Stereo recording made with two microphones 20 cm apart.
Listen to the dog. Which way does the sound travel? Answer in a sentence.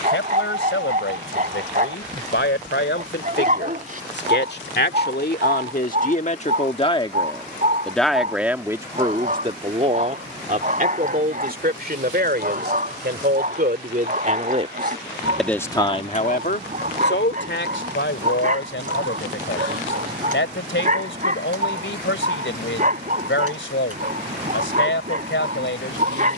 In this clip you hear the dog stay put.